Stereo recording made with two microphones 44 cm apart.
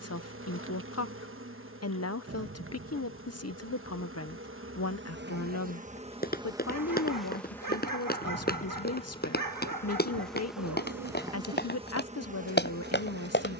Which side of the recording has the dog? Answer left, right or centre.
right.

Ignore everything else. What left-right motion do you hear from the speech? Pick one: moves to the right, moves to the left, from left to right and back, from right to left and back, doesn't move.
doesn't move.